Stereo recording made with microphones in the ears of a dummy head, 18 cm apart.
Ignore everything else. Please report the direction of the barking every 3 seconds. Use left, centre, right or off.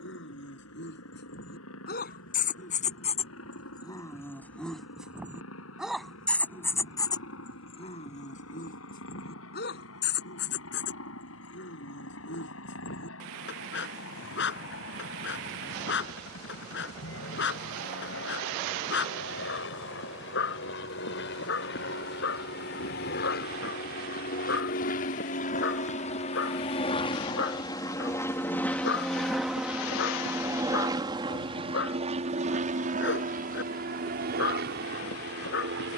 left, centre, left, left, left, left, left, left, left, left, left, left.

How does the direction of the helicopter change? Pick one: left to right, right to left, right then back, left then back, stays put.
left to right.